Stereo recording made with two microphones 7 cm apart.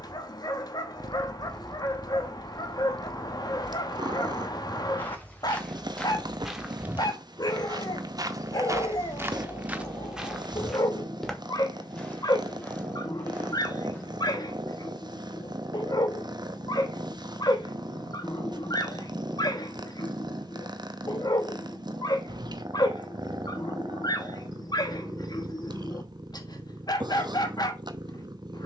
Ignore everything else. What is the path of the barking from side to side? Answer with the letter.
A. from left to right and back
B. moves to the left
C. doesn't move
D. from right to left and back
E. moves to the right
C.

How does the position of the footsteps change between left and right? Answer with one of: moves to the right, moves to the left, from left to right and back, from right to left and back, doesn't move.
from left to right and back.